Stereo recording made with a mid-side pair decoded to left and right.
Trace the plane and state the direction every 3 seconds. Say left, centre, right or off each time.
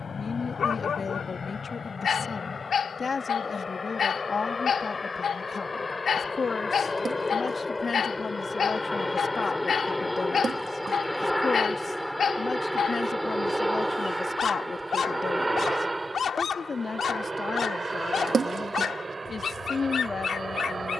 left, left, left, centre, centre, right, right.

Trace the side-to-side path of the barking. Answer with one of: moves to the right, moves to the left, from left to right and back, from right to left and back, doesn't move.
doesn't move.